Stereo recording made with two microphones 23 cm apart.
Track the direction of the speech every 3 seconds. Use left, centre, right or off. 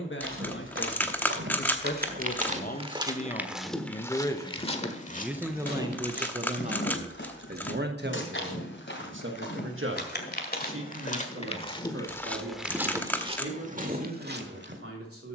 left, centre, right, right, right.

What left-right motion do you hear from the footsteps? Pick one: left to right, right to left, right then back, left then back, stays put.
left then back.